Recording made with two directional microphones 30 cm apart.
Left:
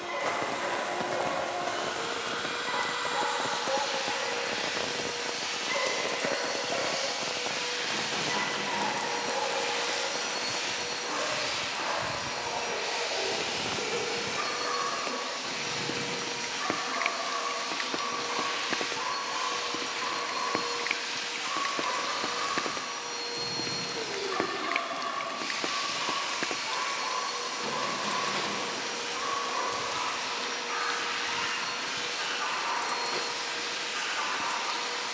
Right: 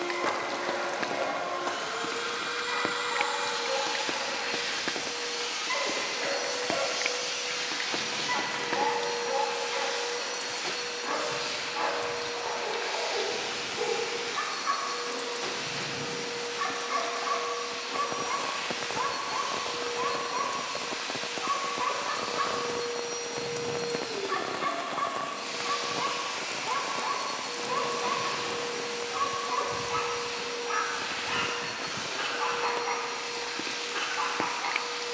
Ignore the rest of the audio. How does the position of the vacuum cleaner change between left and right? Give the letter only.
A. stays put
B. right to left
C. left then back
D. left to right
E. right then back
B.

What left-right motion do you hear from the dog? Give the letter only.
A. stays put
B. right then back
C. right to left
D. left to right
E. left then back
D.